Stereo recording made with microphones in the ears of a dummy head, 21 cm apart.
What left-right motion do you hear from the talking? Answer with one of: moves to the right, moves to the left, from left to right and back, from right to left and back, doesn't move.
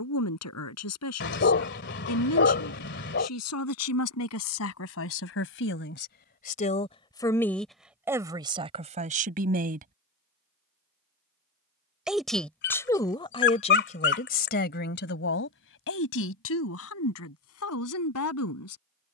from left to right and back.